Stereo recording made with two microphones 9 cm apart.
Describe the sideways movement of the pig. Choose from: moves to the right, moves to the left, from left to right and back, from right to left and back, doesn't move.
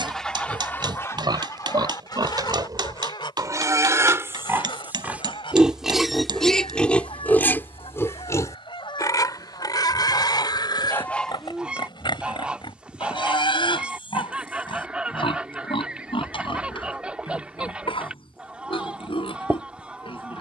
moves to the left.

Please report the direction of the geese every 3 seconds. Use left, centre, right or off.
left, left, left, left, centre, centre, centre.